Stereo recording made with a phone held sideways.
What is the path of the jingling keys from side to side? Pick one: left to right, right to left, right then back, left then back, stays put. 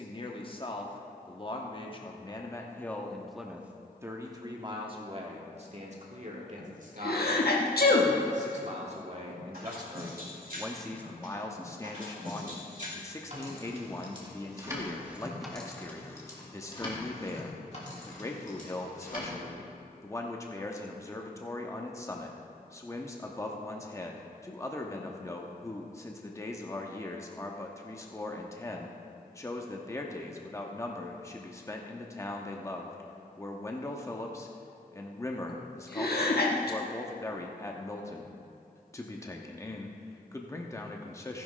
right to left.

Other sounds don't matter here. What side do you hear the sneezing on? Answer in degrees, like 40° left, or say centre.
80° left.